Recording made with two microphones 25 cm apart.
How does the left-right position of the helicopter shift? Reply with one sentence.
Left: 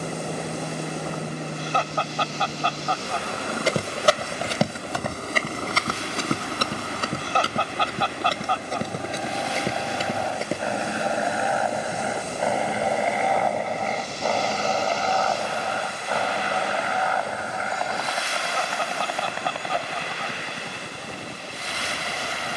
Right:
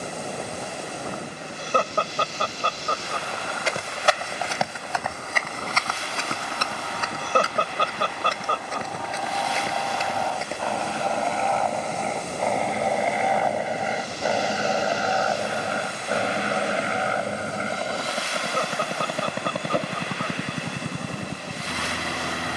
In this clip you hear the helicopter go from the left side to the right.